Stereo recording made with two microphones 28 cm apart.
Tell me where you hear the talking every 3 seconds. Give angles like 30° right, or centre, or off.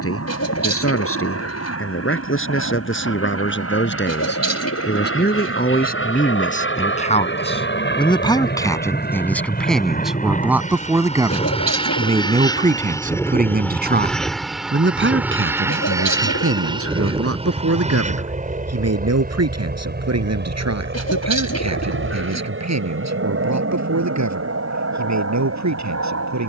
50° left, 40° left, 20° left, centre, 30° right, 50° right, 60° right, 70° right, 70° right.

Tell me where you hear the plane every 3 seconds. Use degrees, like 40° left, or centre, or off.
60° left, 50° left, 40° left, 30° left, 10° left, 10° right, 30° right, 40° right, 50° right.